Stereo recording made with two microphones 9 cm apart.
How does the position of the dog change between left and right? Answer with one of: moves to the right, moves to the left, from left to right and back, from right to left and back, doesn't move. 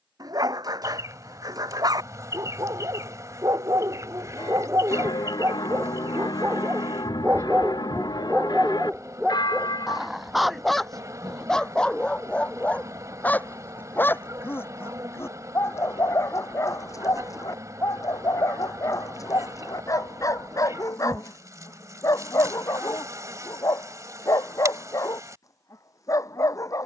moves to the left.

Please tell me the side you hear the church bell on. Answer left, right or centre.
left.